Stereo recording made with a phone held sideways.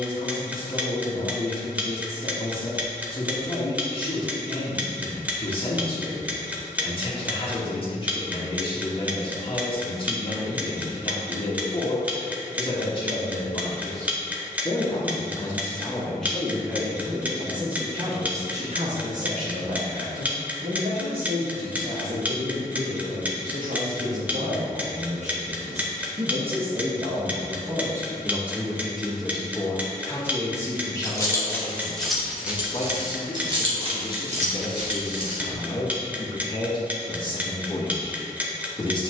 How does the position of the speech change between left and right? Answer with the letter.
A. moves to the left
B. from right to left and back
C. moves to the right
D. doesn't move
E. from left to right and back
E.